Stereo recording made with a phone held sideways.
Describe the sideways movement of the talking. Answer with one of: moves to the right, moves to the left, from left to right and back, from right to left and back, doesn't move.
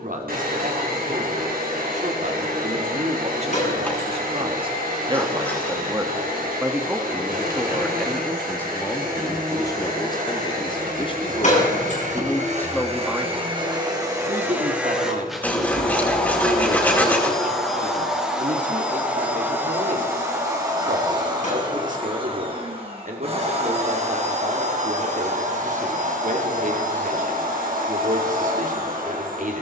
from right to left and back.